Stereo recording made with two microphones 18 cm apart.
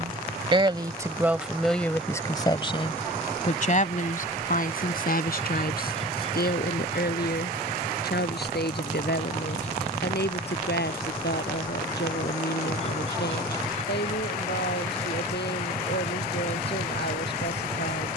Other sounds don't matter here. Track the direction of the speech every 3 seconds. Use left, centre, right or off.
centre, left, left, left, left, left.